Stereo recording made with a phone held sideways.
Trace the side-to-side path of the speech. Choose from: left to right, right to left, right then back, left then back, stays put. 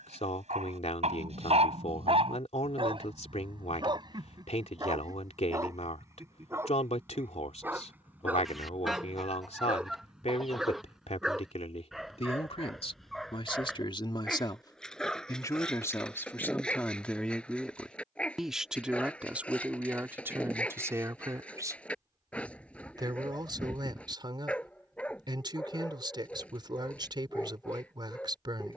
left to right.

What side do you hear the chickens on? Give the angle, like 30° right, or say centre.
centre.